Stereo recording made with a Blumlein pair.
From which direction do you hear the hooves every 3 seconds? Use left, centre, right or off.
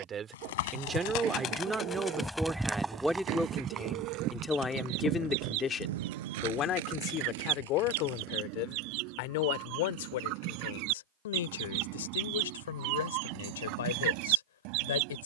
left, right, right, off, off.